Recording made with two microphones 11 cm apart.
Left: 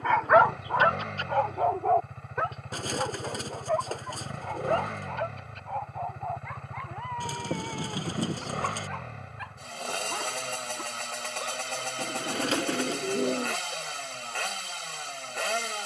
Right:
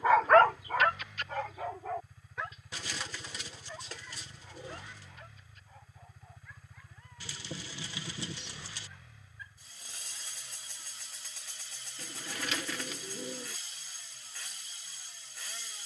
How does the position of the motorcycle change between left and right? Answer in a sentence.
You can hear the motorcycle stay in one place.